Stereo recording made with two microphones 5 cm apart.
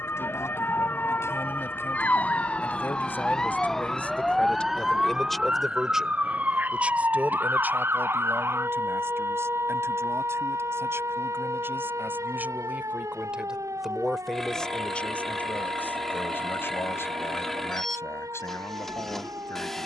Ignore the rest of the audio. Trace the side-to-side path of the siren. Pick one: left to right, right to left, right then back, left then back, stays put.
left to right.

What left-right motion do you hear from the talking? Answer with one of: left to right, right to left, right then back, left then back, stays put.
right then back.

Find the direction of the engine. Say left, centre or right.
centre.